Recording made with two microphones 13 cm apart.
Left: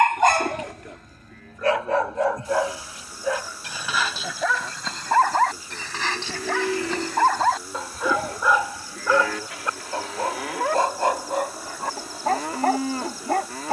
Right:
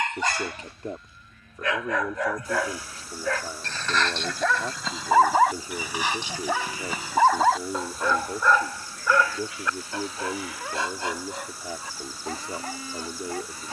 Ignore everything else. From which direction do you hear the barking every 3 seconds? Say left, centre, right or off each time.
left, centre, centre, left, left.